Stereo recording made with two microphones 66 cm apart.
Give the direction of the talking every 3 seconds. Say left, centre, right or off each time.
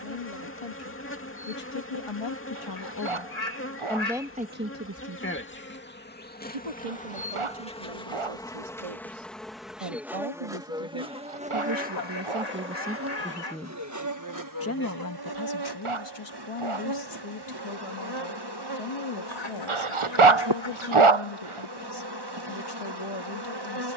left, centre, right, right, centre, left, left, left.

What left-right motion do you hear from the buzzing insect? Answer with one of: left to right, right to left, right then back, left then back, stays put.
left to right.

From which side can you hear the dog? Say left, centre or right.
right.